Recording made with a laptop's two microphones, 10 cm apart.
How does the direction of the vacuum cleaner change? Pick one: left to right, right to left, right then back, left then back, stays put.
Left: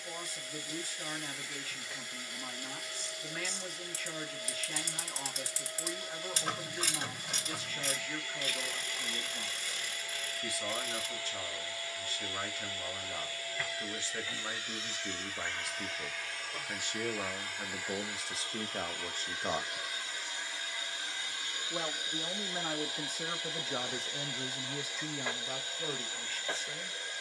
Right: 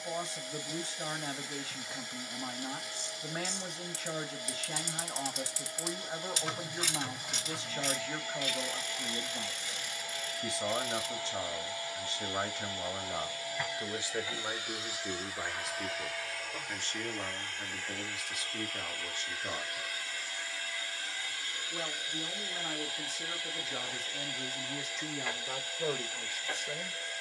right to left.